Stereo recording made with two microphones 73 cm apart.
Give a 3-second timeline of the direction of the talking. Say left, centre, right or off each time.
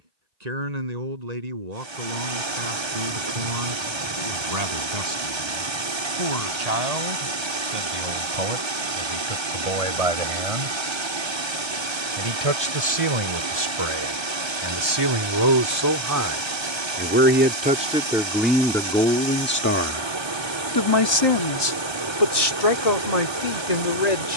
right, right, right, right, right, right, centre, left.